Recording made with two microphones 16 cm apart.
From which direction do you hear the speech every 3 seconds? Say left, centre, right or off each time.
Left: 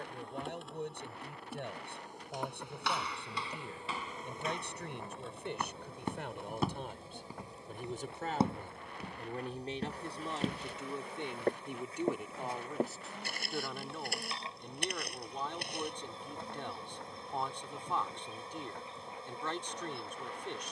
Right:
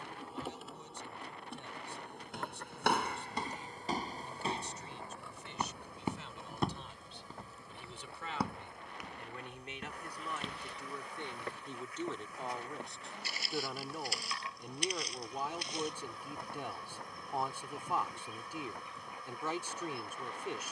left, left, left, left, centre, centre, centre.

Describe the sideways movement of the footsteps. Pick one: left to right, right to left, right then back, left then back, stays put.
right to left.